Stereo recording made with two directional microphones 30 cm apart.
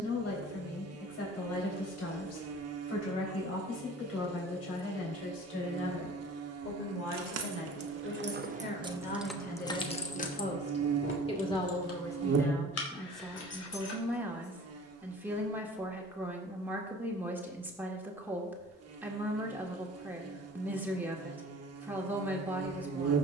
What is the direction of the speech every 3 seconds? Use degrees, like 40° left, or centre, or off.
50° left, 50° left, 40° left, 20° left, centre, 10° right, 10° right, 10° right.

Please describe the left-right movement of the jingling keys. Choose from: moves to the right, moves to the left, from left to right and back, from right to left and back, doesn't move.
moves to the left.